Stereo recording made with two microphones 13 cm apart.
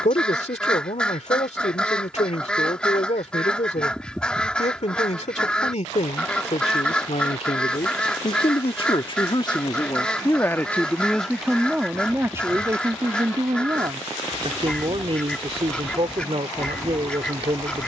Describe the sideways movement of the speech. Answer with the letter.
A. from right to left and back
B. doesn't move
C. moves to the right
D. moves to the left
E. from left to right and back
C.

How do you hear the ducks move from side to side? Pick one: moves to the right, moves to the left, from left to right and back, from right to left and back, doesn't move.
doesn't move.